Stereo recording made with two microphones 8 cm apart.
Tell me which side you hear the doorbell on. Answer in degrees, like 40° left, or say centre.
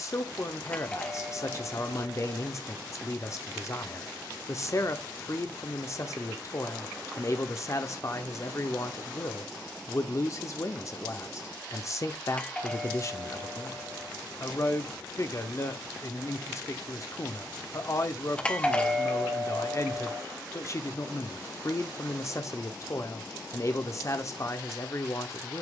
20° left.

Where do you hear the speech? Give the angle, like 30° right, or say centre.
40° left.